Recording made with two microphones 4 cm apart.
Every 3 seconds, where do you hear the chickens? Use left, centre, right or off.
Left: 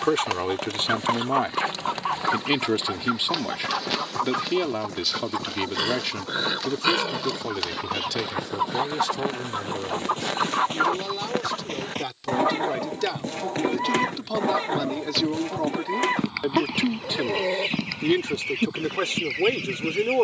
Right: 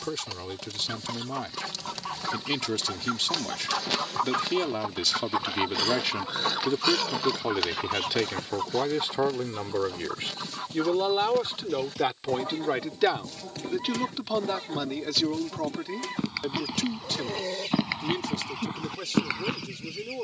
left, centre, centre, left, left, left, left.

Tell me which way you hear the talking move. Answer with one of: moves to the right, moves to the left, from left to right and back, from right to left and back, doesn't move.
from left to right and back.